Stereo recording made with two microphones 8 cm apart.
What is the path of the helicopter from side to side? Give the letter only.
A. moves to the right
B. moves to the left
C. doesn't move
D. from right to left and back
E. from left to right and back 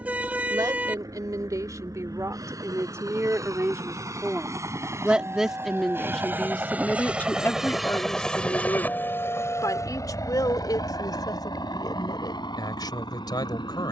B.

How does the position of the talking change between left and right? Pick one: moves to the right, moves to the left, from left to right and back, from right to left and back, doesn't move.
moves to the left.